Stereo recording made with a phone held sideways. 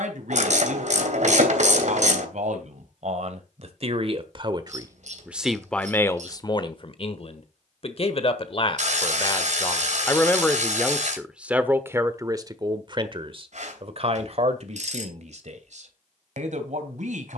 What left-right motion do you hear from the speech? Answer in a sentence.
You can hear the speech go left and come back.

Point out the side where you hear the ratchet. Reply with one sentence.
You can hear the ratchet on the right.